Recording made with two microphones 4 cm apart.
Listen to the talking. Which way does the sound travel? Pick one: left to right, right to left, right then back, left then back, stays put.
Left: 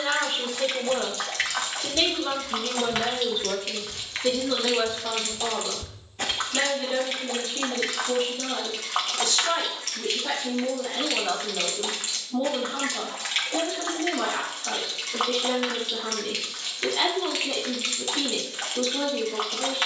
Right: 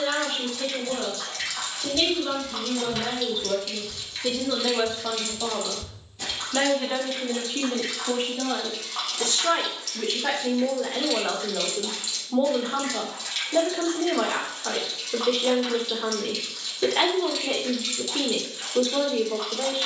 left to right.